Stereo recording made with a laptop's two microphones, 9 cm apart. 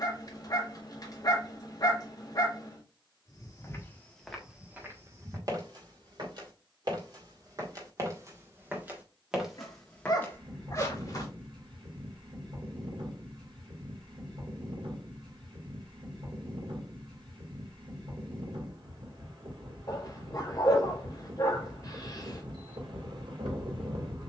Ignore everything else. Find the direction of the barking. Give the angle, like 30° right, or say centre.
40° left.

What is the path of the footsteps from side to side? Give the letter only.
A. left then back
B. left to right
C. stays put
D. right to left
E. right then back
E.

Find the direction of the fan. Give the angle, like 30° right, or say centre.
70° right.